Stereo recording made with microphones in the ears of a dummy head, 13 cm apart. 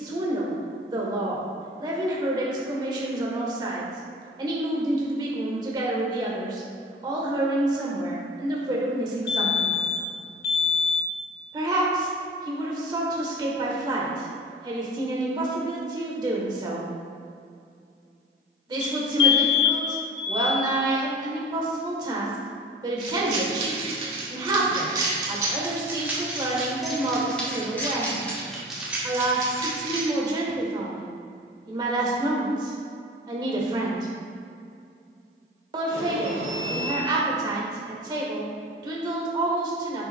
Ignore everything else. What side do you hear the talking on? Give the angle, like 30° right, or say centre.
30° right.